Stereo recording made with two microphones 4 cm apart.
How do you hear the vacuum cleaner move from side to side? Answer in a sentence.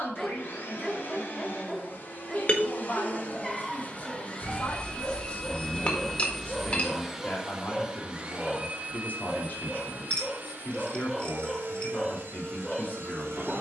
In this clip you hear the vacuum cleaner move to the right.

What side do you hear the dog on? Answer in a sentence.
In this clip you hear the dog in the centre.